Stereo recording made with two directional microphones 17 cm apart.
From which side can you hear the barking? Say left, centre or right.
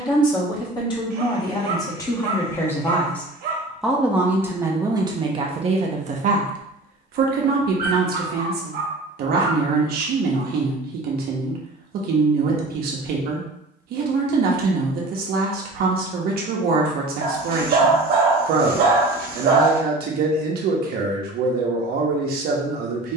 right.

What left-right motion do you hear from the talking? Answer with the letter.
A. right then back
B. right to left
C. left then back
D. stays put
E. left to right
E.